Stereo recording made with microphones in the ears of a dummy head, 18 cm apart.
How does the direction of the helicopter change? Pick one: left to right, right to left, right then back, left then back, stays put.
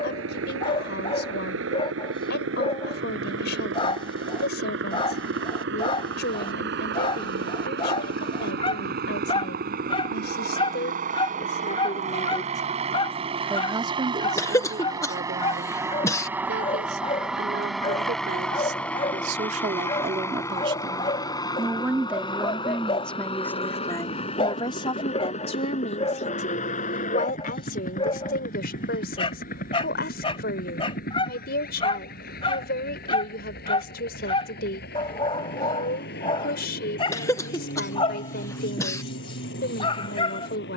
right to left.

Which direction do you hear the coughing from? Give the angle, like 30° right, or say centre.
20° left.